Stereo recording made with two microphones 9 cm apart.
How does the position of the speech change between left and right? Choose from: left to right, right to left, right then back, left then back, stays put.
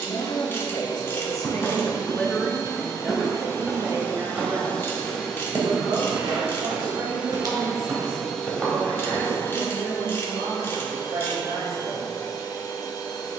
left to right.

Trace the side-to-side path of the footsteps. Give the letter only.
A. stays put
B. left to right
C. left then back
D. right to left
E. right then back
E.